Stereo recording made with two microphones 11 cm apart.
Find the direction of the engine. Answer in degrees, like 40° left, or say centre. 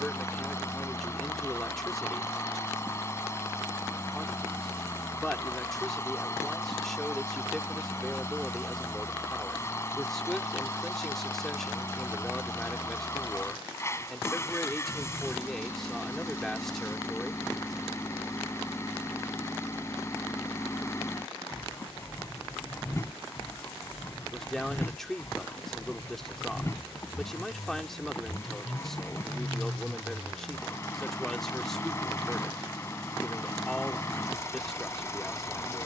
30° left.